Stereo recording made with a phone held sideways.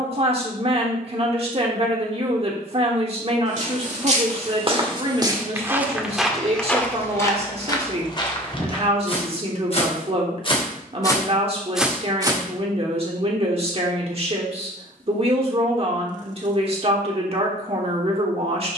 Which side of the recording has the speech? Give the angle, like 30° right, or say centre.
40° right.